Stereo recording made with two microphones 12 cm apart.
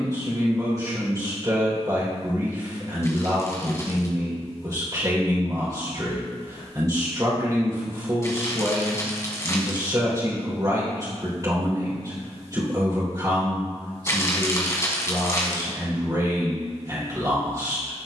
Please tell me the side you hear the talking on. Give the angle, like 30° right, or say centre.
30° right.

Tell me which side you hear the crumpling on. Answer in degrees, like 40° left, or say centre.
20° left.